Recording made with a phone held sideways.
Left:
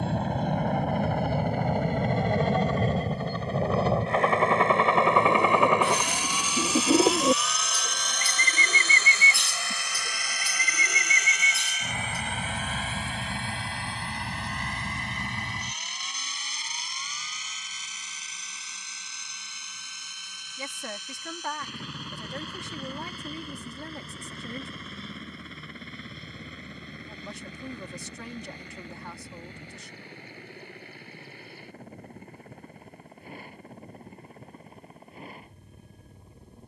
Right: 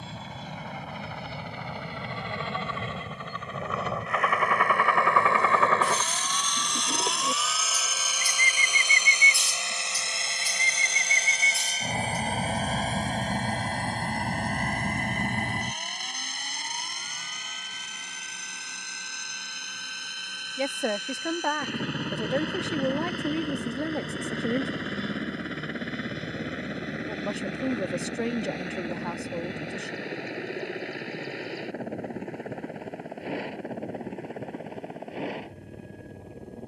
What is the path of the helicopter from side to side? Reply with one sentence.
You can hear the helicopter move from left to right.